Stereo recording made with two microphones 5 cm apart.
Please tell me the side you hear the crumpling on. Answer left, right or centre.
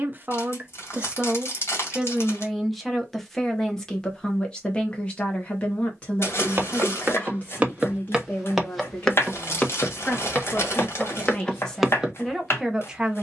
left.